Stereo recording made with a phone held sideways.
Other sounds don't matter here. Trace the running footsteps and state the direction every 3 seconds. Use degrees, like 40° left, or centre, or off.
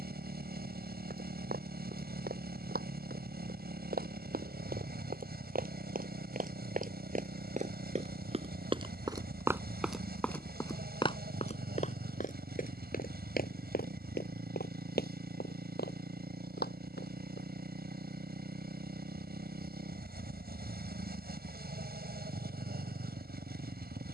70° right, 70° right, 50° right, 10° left, 60° left, 80° left, off, off.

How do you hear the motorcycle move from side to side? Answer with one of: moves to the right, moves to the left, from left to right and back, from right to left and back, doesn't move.
doesn't move.